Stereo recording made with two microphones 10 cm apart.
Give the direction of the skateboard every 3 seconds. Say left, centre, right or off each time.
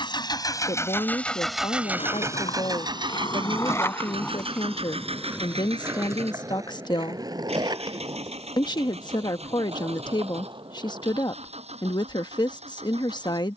left, centre, right, right, off.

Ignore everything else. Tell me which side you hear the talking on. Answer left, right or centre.
left.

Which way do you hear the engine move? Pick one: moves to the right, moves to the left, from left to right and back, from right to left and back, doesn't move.
moves to the right.